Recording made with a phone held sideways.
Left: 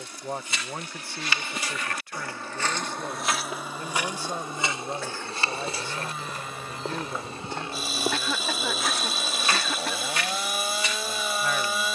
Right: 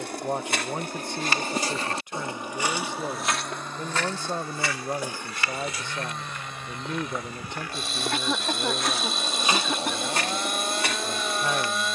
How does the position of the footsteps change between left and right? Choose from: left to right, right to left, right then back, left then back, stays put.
left then back.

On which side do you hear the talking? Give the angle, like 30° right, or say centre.
20° right.